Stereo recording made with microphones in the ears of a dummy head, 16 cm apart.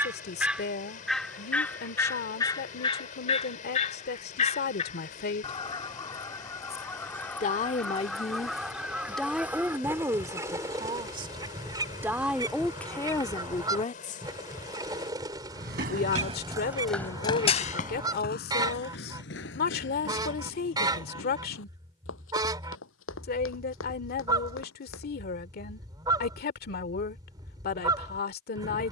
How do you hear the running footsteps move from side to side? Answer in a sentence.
In this clip you hear the running footsteps go from the right side to the left.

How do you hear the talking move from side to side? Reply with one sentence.
You can hear the talking go right and come back.